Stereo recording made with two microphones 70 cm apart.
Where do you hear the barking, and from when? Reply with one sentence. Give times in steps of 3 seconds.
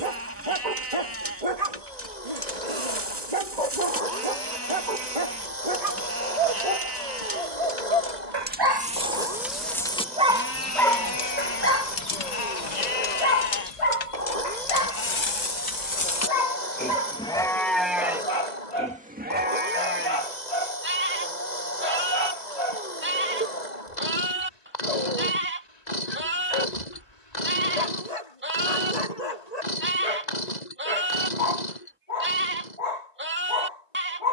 In this clip you hear the barking on the right from 0 s, in the centre from 9 s and on the left from 12 s.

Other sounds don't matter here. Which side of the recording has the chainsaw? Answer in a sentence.
In this clip you hear the chainsaw on the left.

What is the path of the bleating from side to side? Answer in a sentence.
You can hear the bleating go left and come back.